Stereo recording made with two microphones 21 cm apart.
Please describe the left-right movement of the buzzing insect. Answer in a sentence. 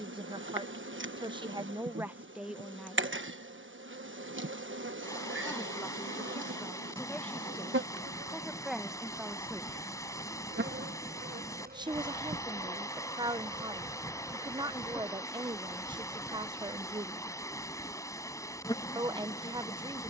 In this clip you hear the buzzing insect travel towards the left.